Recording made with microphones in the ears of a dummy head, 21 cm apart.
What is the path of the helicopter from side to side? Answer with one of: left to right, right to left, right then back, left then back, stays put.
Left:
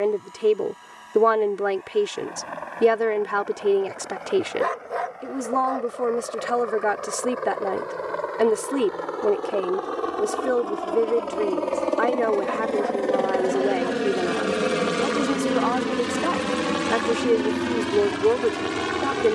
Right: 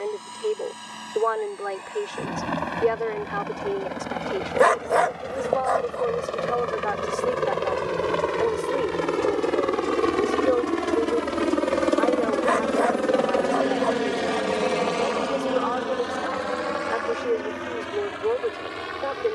right to left.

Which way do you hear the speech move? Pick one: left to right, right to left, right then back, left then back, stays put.
stays put.